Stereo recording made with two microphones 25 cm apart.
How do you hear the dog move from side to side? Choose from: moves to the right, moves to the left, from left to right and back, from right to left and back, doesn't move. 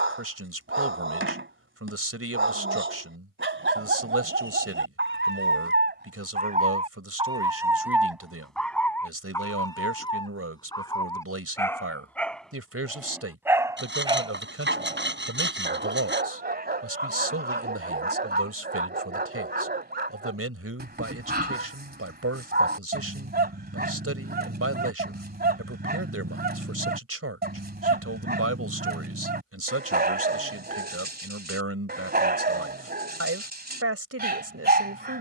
from right to left and back.